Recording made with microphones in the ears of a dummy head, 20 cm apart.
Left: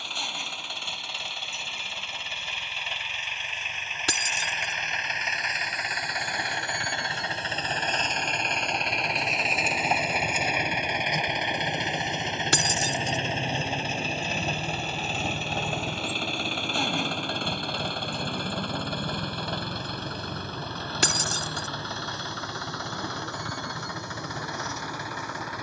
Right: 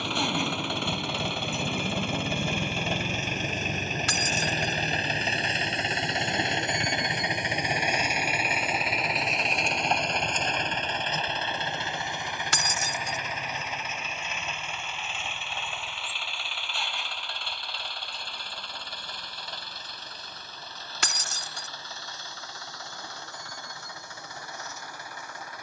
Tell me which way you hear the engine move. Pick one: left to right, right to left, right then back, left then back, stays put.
right to left.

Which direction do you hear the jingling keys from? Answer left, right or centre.
left.